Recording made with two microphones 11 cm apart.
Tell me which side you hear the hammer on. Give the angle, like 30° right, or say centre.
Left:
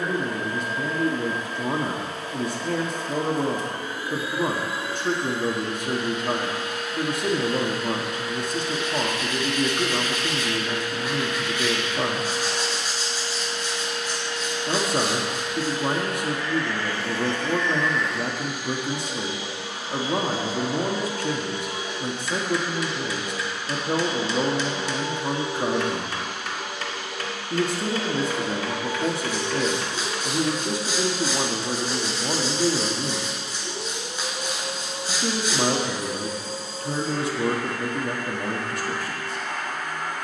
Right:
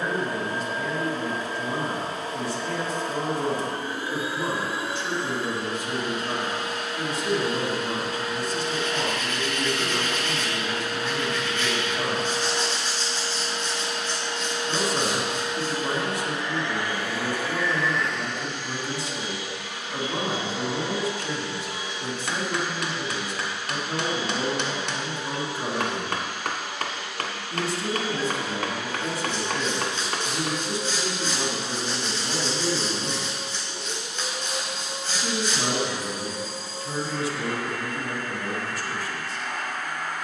60° right.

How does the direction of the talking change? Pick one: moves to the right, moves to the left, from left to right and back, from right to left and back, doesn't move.
doesn't move.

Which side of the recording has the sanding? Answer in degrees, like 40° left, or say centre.
10° left.